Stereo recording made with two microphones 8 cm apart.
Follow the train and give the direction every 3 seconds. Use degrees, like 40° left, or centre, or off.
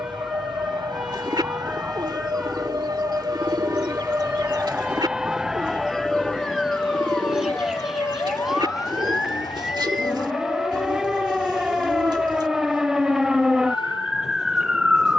60° right, 20° right, 30° left, 50° left, 60° left.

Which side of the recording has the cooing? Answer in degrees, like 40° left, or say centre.
60° right.